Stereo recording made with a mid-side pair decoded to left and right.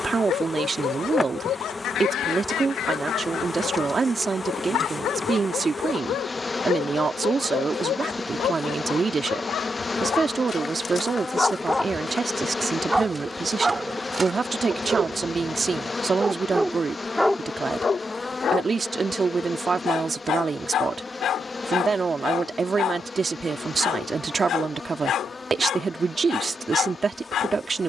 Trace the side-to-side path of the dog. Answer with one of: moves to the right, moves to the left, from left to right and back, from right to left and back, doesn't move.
from left to right and back.